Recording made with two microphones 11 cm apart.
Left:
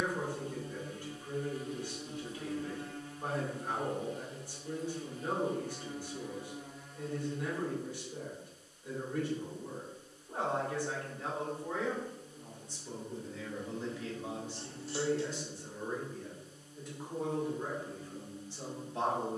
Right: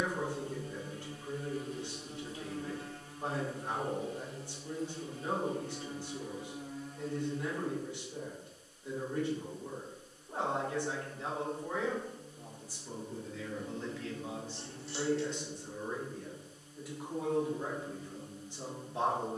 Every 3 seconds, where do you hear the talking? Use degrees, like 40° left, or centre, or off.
20° right, 20° right, 20° right, 20° right, centre, centre, 20° right.